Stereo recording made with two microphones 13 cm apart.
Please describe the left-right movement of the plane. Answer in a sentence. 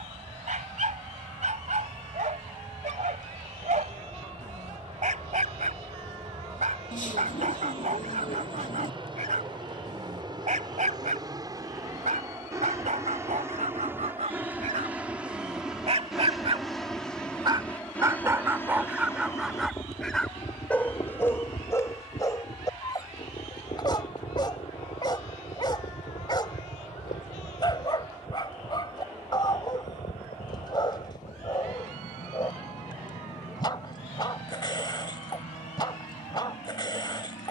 In this clip you hear the plane travel towards the left.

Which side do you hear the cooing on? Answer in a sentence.
You can hear the cooing on the left.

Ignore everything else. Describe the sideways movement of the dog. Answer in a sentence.
You can hear the dog move from right to left.